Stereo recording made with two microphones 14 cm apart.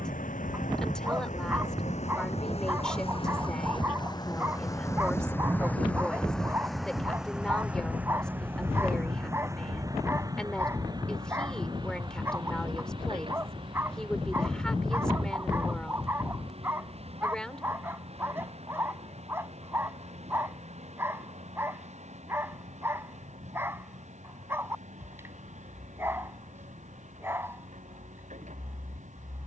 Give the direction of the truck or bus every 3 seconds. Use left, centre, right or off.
left, left, centre, right, right, right, right, right, right, right.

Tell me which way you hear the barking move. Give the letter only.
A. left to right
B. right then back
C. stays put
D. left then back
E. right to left
C.